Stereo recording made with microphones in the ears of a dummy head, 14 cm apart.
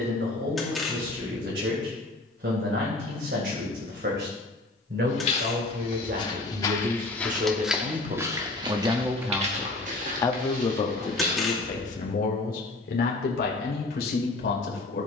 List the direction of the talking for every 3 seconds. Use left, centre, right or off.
right, right, right, left, left.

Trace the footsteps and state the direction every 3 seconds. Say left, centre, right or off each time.
off, left, centre, right, off.